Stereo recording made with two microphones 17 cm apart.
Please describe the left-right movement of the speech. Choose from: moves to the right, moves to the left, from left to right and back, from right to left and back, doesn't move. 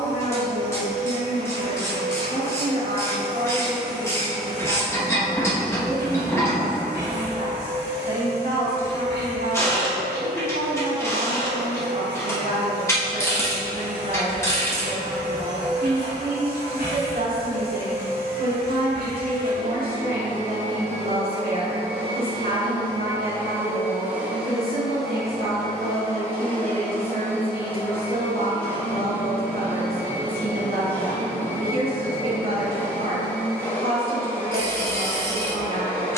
doesn't move.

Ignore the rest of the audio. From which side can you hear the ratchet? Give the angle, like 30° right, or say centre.
20° left.